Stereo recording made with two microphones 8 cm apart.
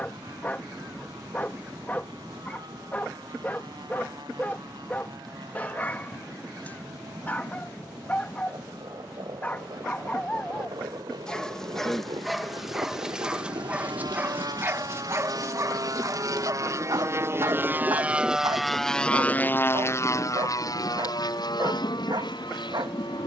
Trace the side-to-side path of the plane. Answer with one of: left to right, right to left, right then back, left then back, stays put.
right to left.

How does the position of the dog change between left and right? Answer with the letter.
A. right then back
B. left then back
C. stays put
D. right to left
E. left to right
E.